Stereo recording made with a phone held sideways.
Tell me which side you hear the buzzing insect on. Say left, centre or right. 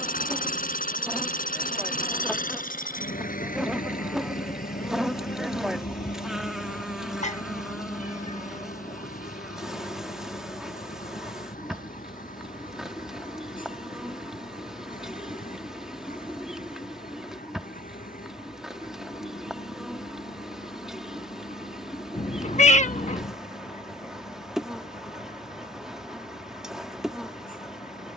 centre.